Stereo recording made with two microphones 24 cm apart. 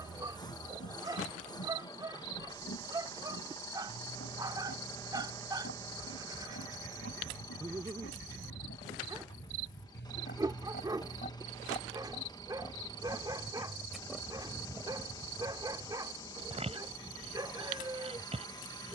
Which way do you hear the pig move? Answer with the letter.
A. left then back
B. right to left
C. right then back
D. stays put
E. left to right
E.